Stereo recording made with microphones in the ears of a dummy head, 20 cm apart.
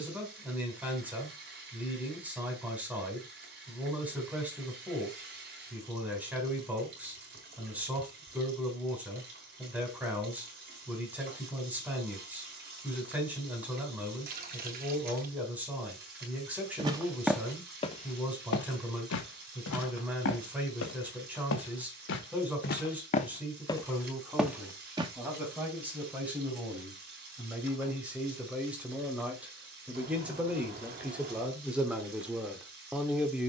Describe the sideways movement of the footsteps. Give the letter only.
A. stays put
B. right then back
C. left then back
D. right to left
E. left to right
C.